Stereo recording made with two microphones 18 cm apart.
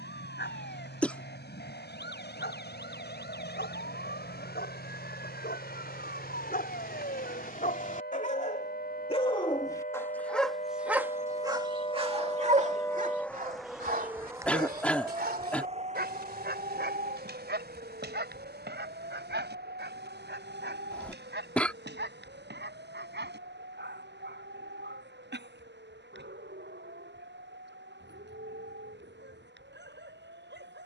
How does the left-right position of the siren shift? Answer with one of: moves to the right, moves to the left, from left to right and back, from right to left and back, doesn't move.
moves to the right.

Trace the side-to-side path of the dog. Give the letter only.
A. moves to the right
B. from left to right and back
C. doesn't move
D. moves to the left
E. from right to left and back
A.